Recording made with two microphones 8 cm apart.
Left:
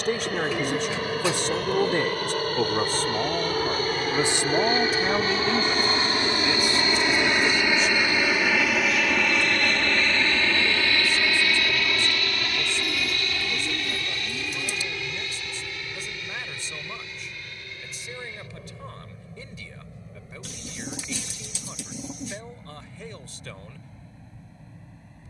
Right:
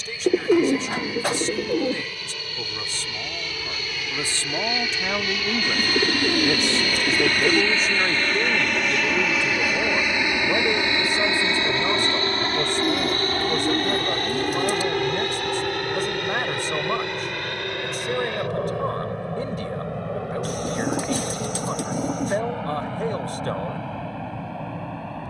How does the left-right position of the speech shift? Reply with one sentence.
You can hear the speech move from left to right.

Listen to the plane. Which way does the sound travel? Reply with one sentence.
In this clip you hear the plane go from the left side to the right.